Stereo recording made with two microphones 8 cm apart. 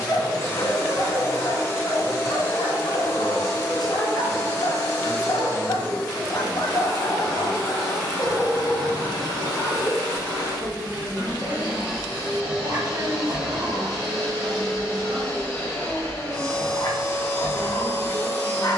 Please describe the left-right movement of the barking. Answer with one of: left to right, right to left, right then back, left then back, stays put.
right then back.